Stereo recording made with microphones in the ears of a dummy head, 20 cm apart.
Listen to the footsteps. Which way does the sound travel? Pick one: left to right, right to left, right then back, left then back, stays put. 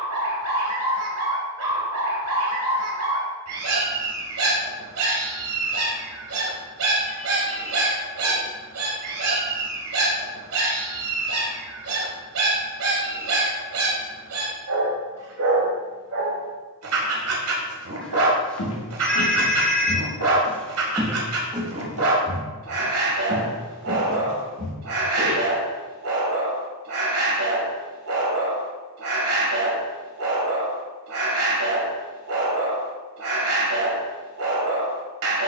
left to right.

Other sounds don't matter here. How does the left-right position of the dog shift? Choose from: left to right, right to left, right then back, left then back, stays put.
stays put.